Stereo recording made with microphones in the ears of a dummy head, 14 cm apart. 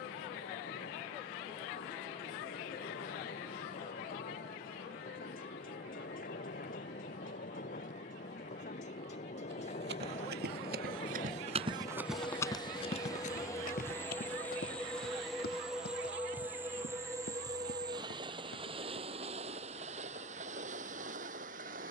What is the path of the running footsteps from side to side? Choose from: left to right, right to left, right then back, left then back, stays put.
right to left.